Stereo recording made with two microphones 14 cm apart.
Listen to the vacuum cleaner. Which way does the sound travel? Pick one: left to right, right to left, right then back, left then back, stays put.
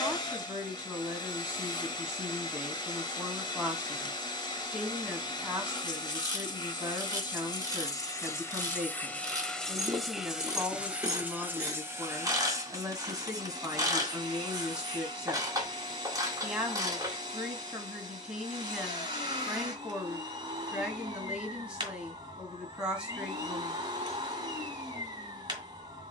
left to right.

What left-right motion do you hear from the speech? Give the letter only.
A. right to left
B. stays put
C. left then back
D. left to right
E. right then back
B.